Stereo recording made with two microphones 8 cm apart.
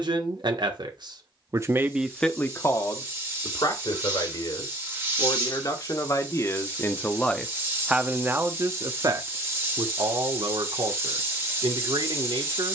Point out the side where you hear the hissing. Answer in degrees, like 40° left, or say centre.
30° right.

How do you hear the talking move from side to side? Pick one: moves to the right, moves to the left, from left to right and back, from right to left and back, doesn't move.
from right to left and back.